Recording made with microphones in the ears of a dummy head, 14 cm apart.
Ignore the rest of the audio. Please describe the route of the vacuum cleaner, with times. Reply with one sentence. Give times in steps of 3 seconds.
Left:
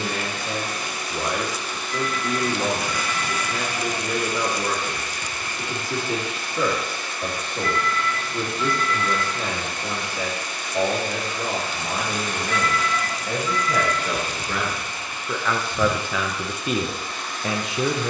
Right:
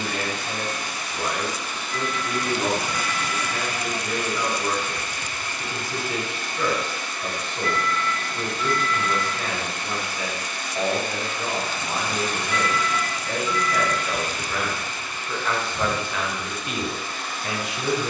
You can hear the vacuum cleaner on the left from 0 s and in the centre from 15 s.